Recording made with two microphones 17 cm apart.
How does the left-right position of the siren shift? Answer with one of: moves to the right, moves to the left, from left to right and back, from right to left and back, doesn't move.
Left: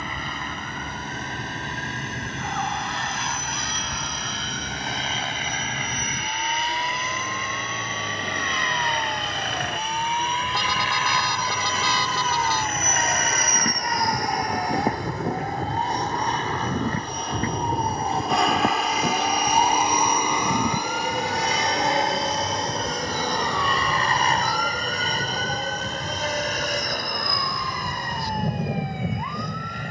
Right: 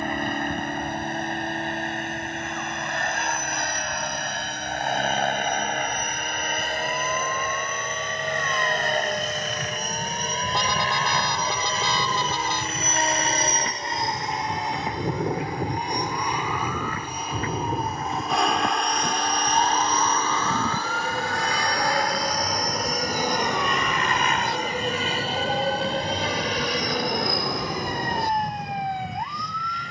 moves to the right.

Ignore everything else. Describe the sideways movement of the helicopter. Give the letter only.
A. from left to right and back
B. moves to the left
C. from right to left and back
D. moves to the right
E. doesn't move
B.